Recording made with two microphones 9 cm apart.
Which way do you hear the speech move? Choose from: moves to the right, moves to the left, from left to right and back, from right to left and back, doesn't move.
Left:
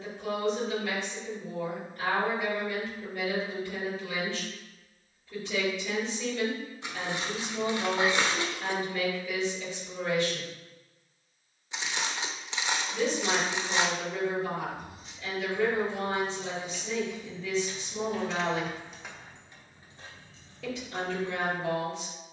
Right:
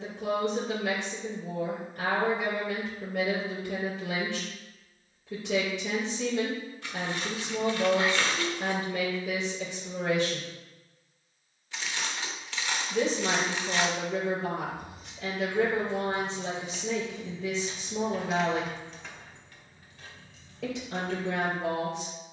doesn't move.